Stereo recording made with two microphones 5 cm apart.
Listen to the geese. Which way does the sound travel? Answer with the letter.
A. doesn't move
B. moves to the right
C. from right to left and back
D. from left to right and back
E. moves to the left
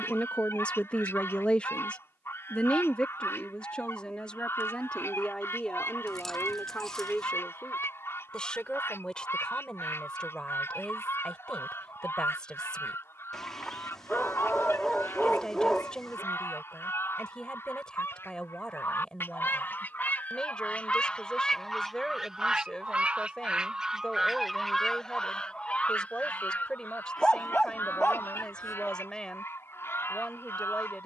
D.